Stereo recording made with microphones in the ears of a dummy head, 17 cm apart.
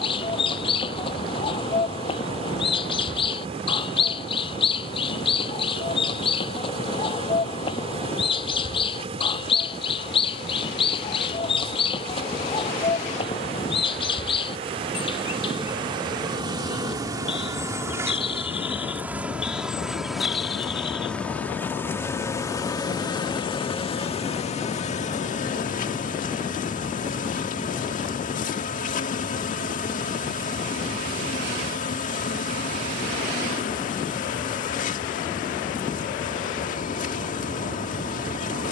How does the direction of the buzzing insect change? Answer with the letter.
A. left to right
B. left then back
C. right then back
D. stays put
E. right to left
E.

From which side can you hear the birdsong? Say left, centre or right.
left.